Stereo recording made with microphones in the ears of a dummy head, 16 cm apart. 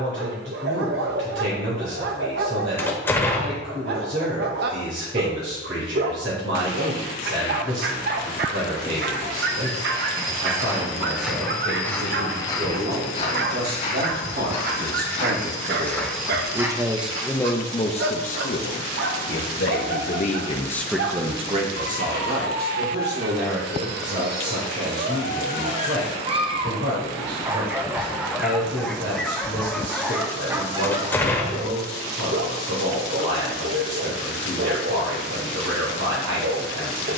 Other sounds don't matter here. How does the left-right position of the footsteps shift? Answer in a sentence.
In this clip you hear the footsteps move from right to left and back again.